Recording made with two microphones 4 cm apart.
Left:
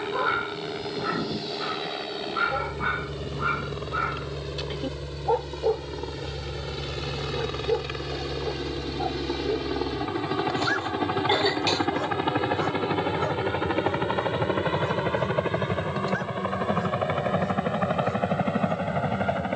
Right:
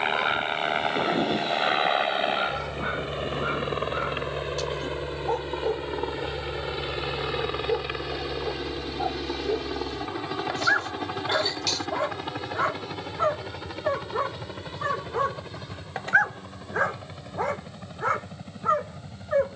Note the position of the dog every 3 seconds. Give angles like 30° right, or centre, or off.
20° left, 20° left, centre, 20° right, 50° right, 60° right, 70° right.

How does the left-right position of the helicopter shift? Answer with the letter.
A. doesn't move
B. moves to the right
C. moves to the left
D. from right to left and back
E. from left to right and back
C.